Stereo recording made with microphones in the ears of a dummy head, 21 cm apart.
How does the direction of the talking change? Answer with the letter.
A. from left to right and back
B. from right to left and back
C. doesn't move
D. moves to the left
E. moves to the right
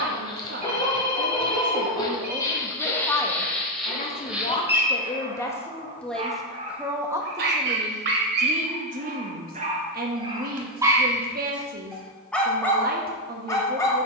B.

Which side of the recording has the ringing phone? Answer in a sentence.
You can hear the ringing phone on the right.